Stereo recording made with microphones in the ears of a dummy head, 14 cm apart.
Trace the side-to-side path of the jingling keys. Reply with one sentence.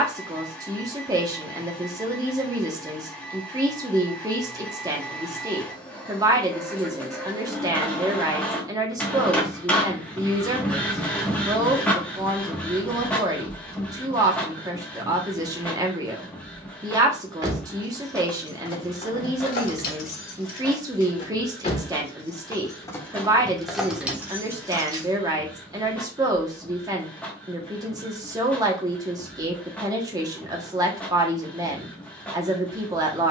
In this clip you hear the jingling keys go left and come back.